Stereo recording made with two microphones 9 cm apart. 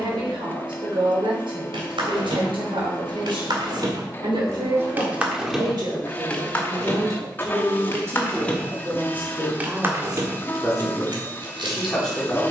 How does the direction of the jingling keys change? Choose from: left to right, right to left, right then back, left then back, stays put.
left then back.